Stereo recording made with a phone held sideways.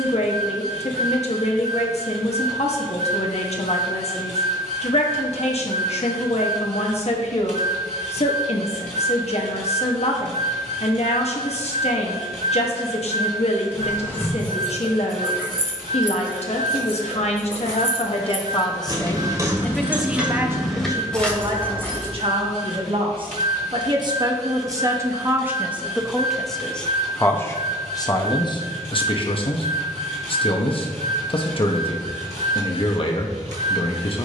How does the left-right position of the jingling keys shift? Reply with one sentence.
In this clip you hear the jingling keys move from left to right and back again.